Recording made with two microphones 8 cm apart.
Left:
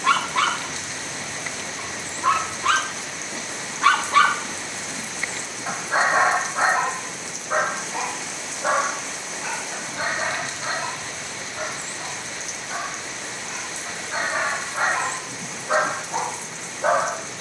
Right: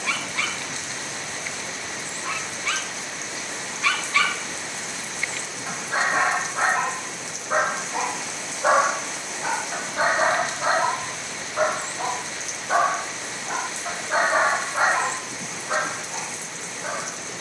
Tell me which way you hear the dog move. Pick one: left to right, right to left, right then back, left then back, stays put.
right then back.